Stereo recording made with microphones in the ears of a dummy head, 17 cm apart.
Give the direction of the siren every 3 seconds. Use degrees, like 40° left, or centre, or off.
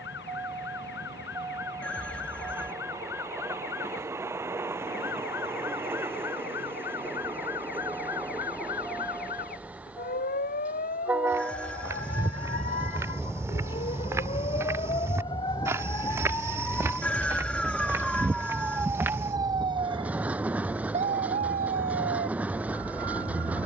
60° left, 60° left, 60° left, 50° left, 40° left, 10° left, 20° right, 50° right.